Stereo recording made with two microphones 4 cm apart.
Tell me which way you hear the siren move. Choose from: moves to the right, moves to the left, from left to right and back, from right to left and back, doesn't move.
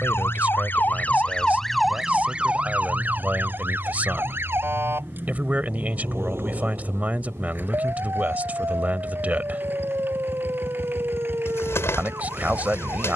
moves to the right.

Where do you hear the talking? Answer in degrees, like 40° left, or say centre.
40° right.